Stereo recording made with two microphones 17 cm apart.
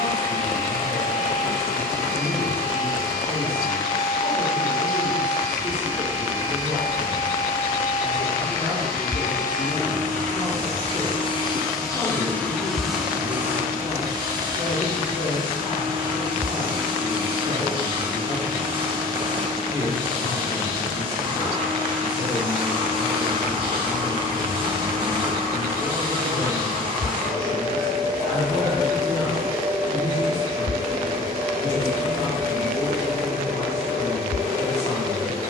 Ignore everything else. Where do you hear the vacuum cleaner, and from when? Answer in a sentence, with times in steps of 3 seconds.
You can hear the vacuum cleaner on the left from 0 s, in the centre from 12 s and on the right from 15 s.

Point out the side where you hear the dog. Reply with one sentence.
In this clip you hear the dog on the right.